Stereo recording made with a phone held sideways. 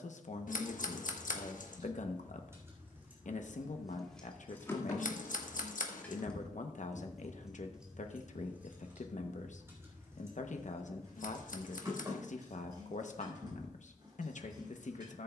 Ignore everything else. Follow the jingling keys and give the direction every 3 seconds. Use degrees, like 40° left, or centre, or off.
20° right, 10° left, centre, 20° right, 30° right.